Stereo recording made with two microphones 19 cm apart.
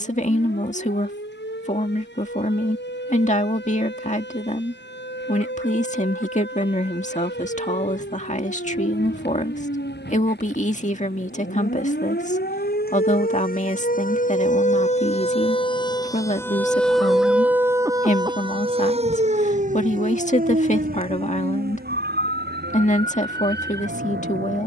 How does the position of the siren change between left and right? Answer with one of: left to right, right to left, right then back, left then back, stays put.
left to right.